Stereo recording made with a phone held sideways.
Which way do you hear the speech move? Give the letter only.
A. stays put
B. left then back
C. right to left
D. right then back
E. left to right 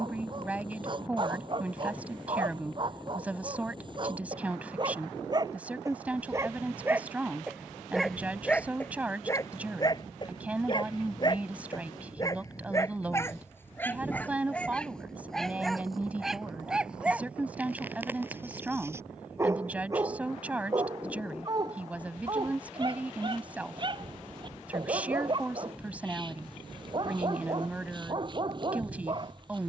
A.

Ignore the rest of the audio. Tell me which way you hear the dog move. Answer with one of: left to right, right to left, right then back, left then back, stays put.
left then back.